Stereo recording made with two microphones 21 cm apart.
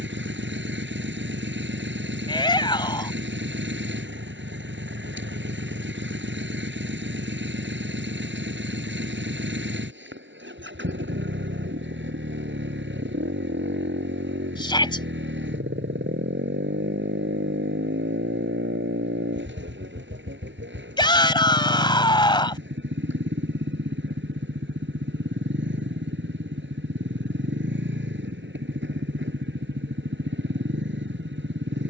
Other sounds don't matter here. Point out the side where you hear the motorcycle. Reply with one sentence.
You can hear the motorcycle on the right.